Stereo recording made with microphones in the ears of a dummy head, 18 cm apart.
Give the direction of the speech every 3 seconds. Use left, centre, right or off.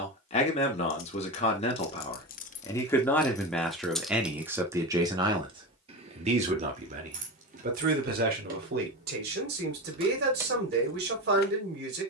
left, centre, right, right.